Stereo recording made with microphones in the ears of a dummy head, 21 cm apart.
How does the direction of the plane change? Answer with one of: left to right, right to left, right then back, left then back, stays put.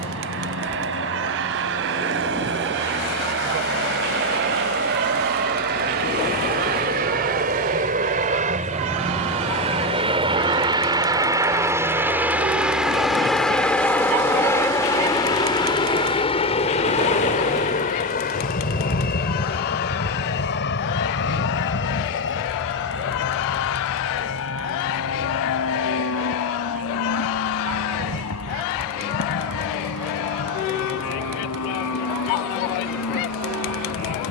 right to left.